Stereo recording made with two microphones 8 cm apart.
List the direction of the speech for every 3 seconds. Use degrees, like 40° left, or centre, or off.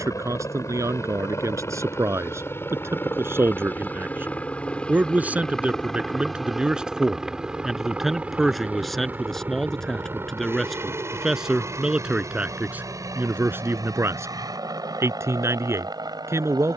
40° right, 20° right, 10° right, centre, 30° right, 40° right.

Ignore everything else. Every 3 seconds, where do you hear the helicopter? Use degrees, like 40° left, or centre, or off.
40° left, 20° left, 10° right, 30° right, 40° right, 50° right.